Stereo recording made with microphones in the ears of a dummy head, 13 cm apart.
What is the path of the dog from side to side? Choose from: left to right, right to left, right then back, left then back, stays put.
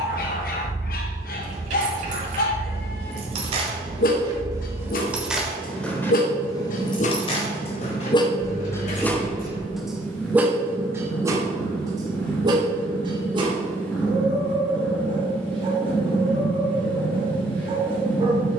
left to right.